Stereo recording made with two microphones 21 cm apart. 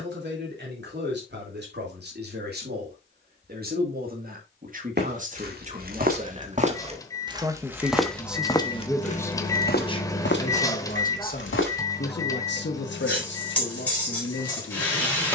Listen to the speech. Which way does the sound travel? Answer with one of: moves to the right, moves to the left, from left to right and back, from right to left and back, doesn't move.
moves to the left.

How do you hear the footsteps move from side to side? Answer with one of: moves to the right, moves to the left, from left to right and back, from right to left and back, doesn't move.
moves to the left.